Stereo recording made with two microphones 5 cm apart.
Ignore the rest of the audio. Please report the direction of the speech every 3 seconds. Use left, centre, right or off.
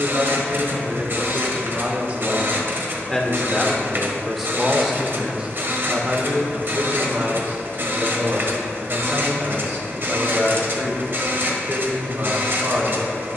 right, centre, right, right, right.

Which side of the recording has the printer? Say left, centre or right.
right.